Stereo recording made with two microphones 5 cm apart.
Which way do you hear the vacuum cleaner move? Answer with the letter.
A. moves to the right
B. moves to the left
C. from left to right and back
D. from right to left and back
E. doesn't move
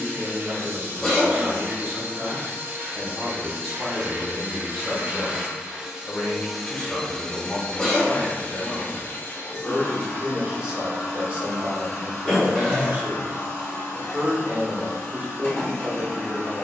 B.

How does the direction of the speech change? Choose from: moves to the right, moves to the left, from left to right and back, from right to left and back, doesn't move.
from right to left and back.